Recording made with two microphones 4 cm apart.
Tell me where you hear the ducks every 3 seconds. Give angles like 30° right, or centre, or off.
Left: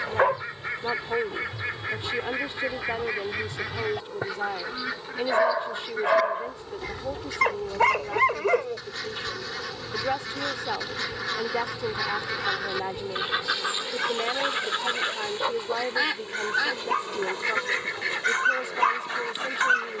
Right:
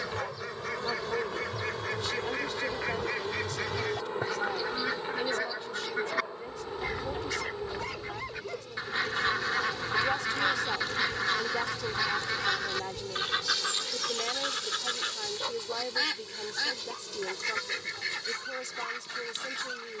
20° left, 10° left, 20° right, 20° right, 20° left, 20° left, 20° left.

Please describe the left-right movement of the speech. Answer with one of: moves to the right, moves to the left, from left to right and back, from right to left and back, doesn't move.
doesn't move.